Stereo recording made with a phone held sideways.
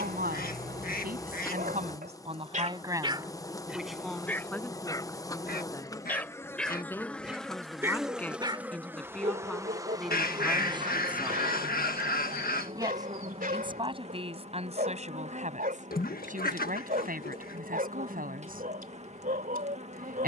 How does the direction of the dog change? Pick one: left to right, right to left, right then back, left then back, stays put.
left then back.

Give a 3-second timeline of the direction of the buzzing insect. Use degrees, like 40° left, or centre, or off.
20° left, 20° left, centre, 20° right, 40° right, 40° right, 40° right.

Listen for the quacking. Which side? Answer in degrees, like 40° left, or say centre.
70° left.